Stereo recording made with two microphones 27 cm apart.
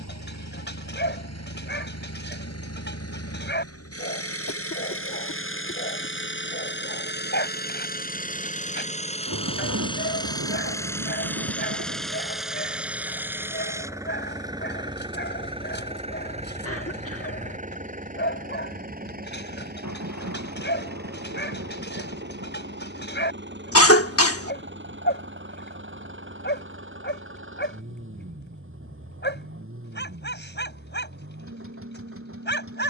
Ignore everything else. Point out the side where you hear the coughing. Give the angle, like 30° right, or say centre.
60° left.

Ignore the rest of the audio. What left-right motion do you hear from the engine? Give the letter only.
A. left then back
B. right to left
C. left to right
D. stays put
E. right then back
C.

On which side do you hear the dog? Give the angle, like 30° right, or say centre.
40° left.